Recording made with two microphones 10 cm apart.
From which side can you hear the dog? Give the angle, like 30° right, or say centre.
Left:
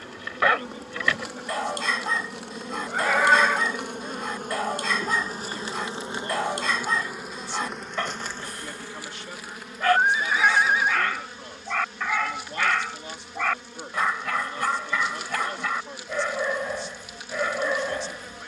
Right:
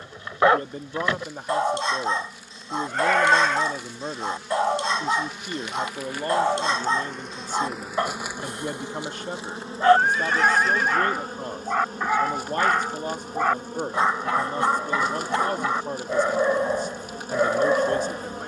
30° right.